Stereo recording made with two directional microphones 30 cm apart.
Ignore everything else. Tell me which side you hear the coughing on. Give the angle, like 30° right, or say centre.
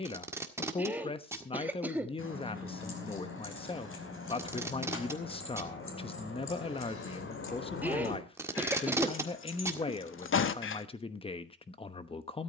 10° right.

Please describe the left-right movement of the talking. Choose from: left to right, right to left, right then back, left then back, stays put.
stays put.